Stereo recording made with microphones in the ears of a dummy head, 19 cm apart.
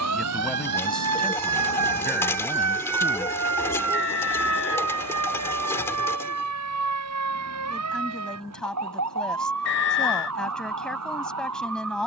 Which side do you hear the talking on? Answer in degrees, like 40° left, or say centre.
centre.